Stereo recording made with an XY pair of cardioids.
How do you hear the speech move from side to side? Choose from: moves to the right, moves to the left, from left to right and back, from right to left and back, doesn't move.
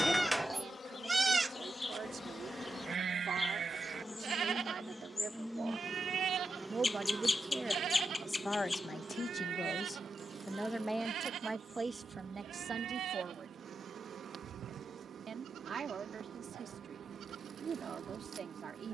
from right to left and back.